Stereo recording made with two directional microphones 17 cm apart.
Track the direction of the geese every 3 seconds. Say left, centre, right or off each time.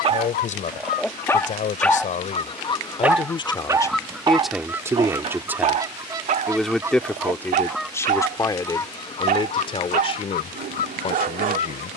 left, centre, centre, left.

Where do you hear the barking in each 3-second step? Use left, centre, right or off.
centre, right, right, right.